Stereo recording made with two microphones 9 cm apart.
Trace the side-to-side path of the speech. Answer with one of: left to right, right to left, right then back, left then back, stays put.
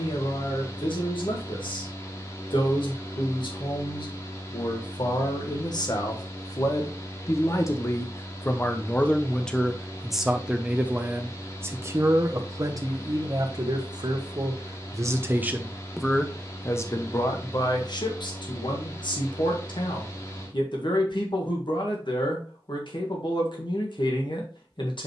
right then back.